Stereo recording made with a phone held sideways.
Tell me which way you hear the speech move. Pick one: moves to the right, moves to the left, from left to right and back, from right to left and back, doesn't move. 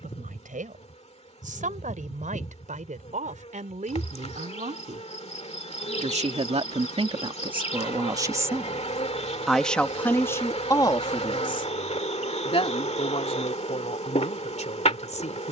moves to the left.